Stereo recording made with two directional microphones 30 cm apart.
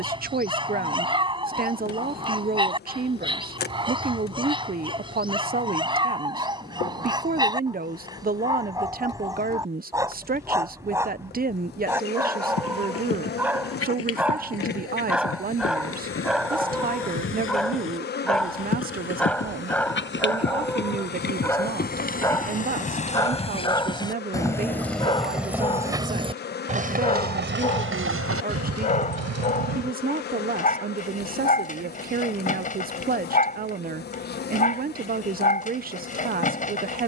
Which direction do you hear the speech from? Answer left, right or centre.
right.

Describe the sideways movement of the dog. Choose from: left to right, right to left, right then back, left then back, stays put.
right to left.